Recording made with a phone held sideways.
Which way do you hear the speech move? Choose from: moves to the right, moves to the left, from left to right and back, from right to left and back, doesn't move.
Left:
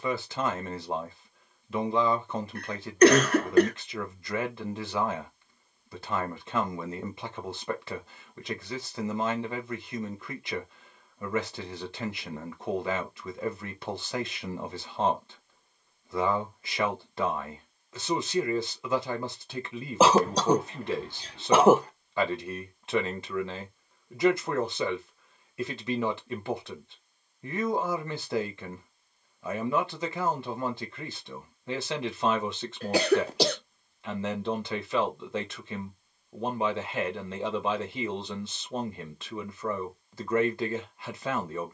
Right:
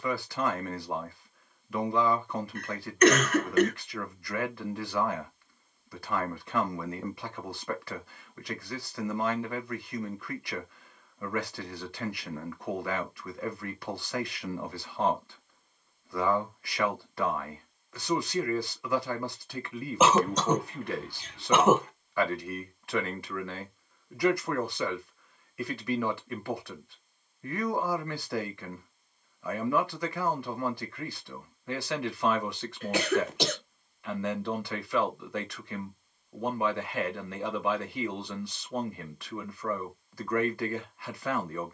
doesn't move.